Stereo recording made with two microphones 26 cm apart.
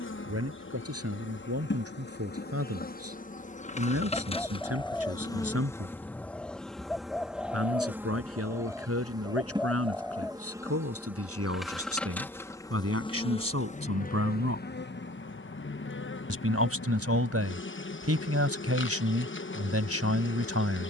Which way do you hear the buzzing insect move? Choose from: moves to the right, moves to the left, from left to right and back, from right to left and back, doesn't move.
from left to right and back.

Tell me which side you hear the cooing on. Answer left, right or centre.
centre.